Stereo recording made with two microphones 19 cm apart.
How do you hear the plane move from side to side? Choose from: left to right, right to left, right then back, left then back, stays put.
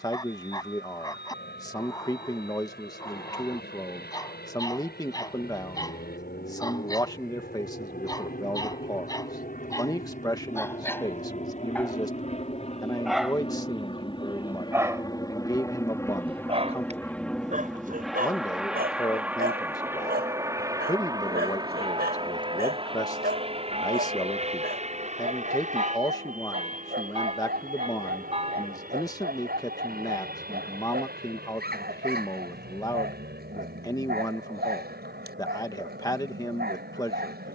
left to right.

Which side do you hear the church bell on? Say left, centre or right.
right.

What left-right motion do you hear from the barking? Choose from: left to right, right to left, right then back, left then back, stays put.
left to right.